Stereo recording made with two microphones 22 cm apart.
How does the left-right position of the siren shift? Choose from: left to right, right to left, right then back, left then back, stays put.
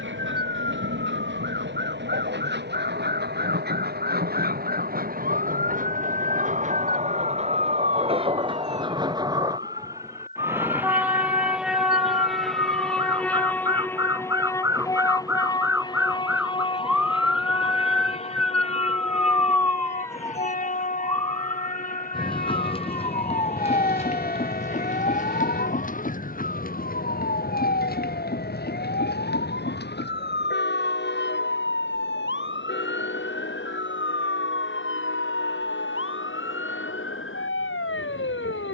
right to left.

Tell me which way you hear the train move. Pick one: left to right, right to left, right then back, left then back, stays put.
right to left.